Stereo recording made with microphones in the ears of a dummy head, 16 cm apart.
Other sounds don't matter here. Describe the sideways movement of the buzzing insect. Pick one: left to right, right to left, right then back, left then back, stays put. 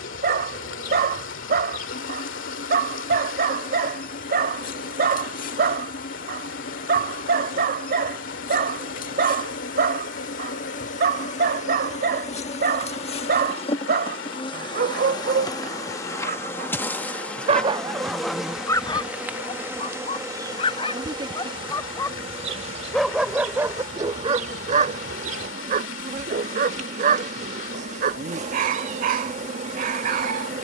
left to right.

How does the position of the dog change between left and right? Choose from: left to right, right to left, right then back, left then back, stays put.
left then back.